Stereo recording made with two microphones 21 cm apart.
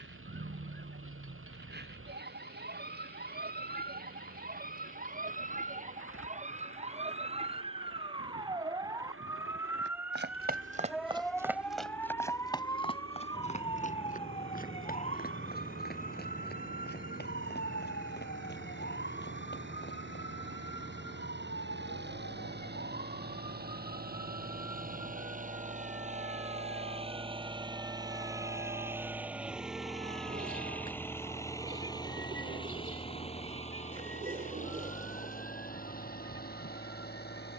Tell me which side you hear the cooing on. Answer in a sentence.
In this clip you hear the cooing on the right.